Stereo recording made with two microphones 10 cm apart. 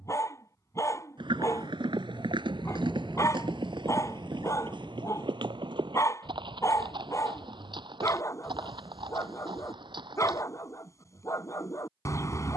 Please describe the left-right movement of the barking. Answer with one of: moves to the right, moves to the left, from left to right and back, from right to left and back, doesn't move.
doesn't move.